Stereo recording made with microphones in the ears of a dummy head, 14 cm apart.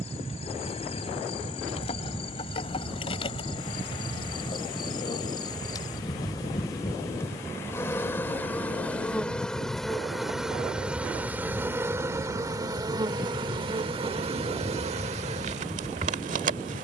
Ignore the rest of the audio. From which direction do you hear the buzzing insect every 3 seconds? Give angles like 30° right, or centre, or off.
40° left, 30° left, 20° left, centre, 30° right, 50° right.